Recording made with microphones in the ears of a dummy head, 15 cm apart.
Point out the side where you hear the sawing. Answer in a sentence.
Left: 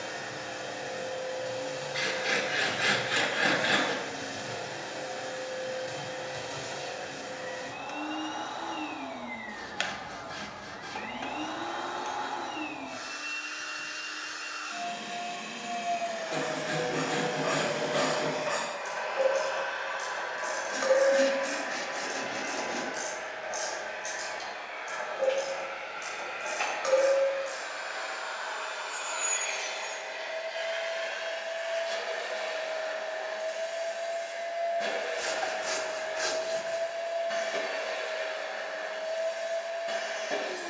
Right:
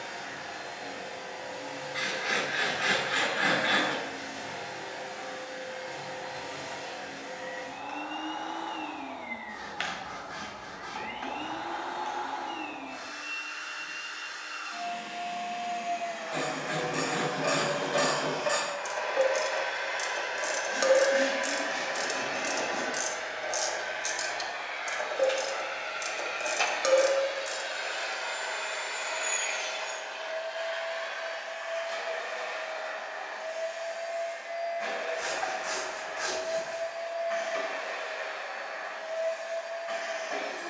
You can hear the sawing on the left.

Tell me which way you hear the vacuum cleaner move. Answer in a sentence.
You can hear the vacuum cleaner move from left to right and back again.